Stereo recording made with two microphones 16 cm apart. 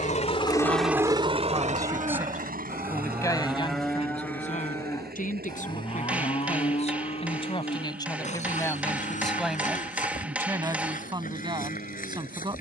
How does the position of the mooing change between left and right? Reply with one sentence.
You can hear the mooing travel towards the left.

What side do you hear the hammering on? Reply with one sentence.
In this clip you hear the hammering in the centre.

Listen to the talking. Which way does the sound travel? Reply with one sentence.
You can hear the talking go left and come back.